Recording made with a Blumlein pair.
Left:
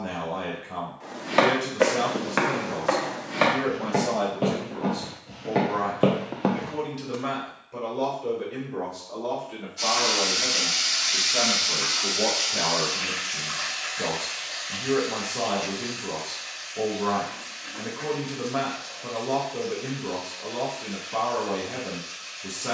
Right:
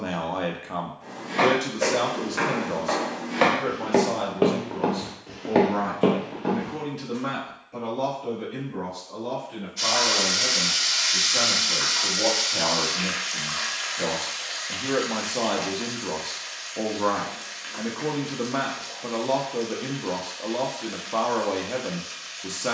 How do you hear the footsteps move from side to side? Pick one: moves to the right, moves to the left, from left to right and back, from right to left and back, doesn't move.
from left to right and back.